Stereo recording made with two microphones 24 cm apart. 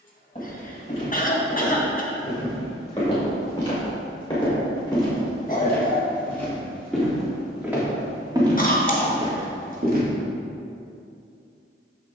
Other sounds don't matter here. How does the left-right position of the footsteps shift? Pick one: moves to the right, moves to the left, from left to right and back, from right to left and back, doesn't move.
moves to the right.